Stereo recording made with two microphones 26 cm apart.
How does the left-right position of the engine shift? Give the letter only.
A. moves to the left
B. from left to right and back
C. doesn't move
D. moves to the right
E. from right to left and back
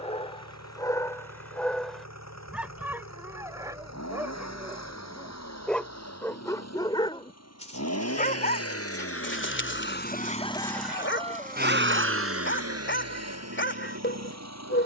D.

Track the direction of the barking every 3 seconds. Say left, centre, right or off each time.
centre, centre, left, left, left.